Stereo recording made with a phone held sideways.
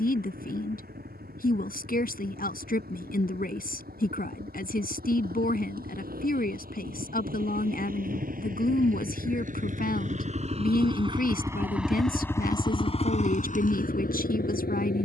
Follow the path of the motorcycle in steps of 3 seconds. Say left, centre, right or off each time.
right, right, right, right, left.